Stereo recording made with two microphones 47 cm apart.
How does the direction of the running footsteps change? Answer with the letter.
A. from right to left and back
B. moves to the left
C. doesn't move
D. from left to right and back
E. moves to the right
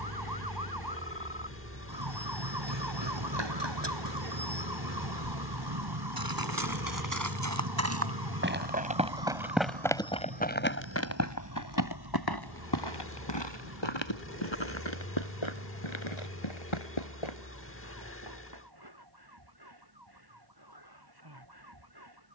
B.